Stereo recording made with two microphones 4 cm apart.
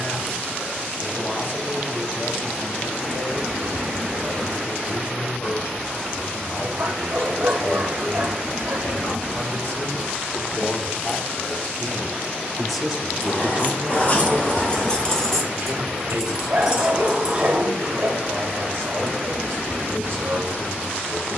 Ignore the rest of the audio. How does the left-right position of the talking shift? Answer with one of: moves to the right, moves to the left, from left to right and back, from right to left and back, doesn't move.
moves to the right.